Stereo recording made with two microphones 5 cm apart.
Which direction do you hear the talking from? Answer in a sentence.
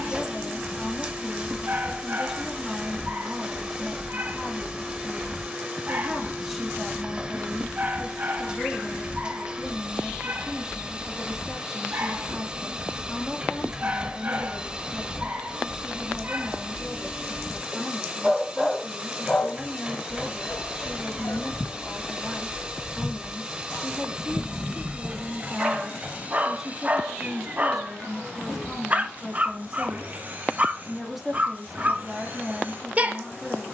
You can hear the talking in the centre.